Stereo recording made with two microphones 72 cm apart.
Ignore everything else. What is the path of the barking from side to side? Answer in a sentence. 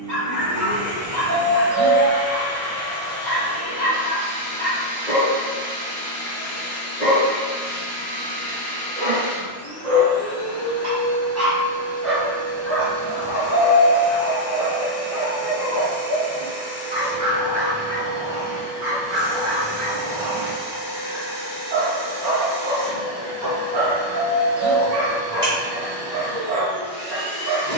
In this clip you hear the barking move from right to left and back again.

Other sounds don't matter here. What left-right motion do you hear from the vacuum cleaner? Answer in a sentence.
In this clip you hear the vacuum cleaner move from left to right.